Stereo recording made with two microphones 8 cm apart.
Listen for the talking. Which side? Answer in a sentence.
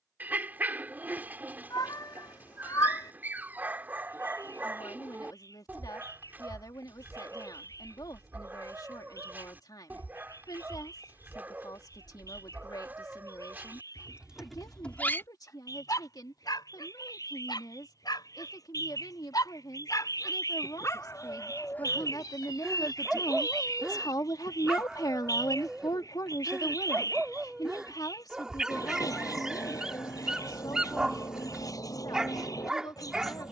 You can hear the talking on the left.